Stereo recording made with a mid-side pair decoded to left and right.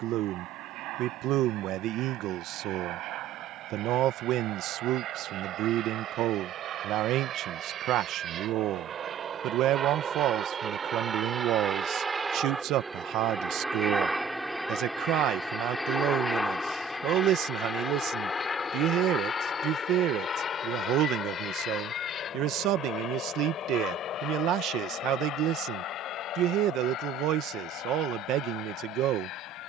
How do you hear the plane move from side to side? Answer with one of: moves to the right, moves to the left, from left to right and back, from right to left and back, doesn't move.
moves to the left.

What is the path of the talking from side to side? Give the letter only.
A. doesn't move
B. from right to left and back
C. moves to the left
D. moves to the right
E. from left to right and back
A.